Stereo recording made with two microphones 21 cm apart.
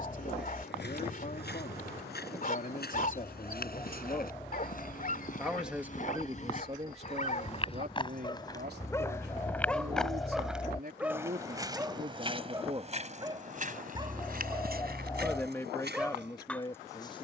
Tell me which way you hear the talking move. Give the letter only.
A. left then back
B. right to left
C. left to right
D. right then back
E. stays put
D.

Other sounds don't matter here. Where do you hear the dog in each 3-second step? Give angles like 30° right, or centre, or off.
40° left, 40° left, 40° left, centre, 20° right, 10° left.